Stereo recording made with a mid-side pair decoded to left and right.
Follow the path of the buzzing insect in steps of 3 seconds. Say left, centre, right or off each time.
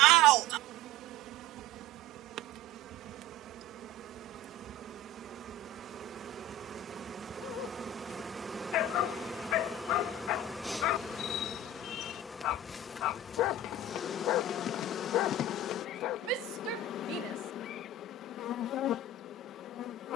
right, right, right, centre, left, left, left.